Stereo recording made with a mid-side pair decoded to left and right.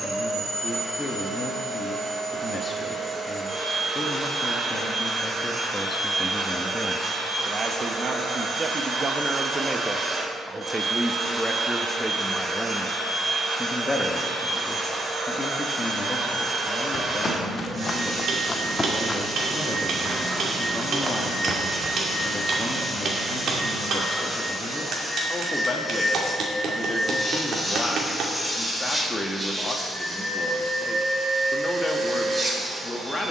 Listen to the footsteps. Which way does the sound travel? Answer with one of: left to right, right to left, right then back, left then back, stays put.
left to right.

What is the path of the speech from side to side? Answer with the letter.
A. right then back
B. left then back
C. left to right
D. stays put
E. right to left
A.